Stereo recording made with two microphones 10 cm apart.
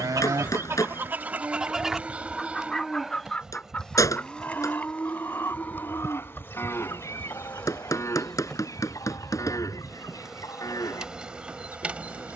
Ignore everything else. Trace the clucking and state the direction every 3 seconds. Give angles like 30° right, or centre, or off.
20° right, 20° left, 30° left, 40° left.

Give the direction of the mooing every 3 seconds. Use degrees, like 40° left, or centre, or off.
20° right, 10° left, 30° left, 40° left.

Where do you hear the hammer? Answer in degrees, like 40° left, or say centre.
30° left.